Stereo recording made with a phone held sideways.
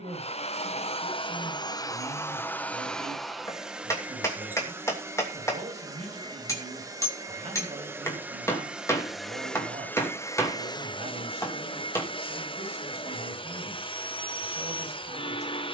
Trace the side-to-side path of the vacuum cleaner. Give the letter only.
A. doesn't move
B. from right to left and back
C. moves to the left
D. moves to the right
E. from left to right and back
E.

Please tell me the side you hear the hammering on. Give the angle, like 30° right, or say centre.
20° left.